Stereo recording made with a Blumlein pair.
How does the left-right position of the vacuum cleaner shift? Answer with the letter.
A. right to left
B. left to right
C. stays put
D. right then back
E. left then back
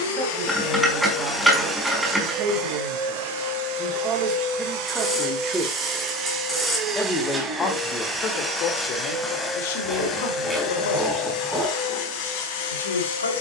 D.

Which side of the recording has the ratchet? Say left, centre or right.
centre.